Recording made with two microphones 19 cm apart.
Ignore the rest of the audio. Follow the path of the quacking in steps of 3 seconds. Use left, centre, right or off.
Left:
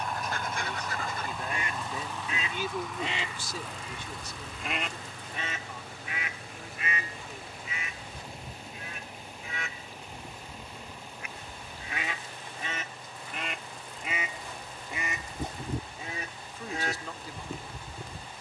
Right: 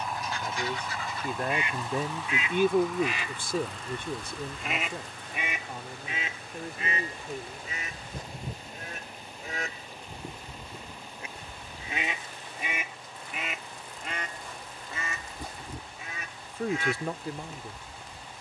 left, centre, right, right, centre, left.